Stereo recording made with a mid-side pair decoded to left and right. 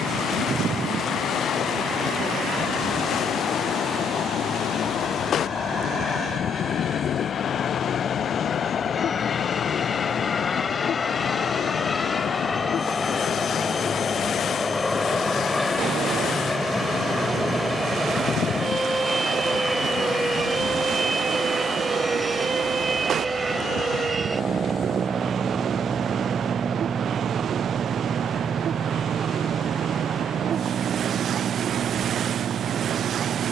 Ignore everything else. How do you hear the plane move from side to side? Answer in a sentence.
You can hear the plane move to the right.